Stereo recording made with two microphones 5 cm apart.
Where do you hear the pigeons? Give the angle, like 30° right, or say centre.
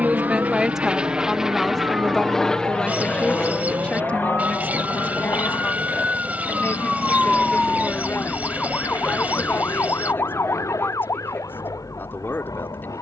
30° right.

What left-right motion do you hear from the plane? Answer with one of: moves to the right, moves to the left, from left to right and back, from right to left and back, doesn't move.
moves to the left.